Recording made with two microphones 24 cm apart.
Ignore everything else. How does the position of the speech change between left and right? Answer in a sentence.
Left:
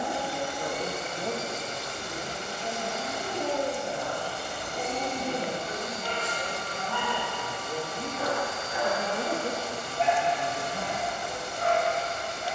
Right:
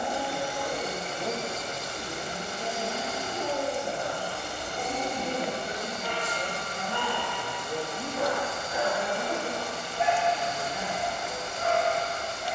In this clip you hear the speech go right and come back.